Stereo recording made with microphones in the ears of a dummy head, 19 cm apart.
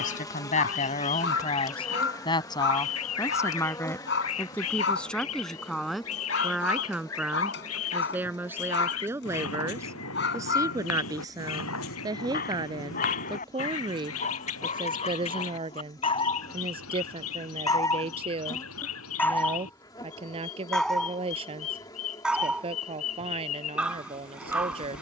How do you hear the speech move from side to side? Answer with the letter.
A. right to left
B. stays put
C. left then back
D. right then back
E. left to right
E.